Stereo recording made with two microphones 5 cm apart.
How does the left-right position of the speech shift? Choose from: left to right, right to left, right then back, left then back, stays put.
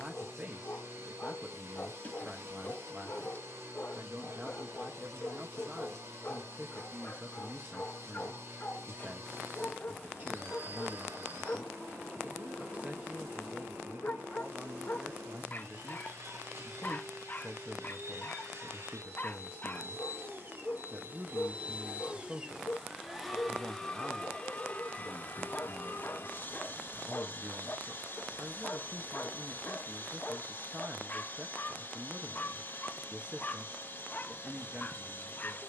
stays put.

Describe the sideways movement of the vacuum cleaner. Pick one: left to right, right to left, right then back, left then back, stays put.
right to left.